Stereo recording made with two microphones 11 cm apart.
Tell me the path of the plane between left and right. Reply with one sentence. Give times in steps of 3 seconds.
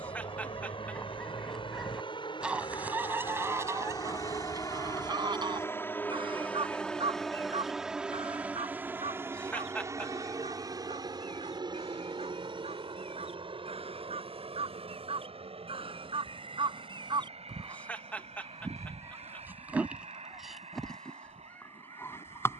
You can hear the plane on the left from 0 s, in the centre from 6 s and on the right from 9 s.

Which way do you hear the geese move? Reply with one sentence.
You can hear the geese go right and come back.